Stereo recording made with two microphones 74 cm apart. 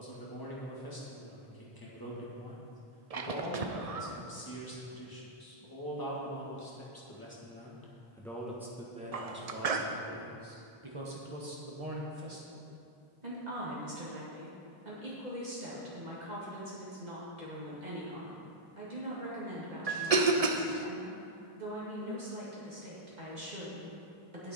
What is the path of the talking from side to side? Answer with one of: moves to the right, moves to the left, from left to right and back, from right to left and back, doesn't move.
moves to the right.